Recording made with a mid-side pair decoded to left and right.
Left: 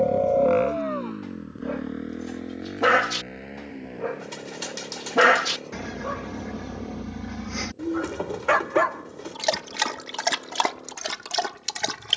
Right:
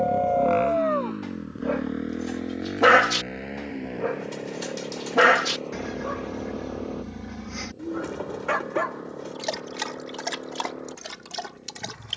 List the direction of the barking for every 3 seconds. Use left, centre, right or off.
right, centre, left, left.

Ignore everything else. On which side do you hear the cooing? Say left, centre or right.
left.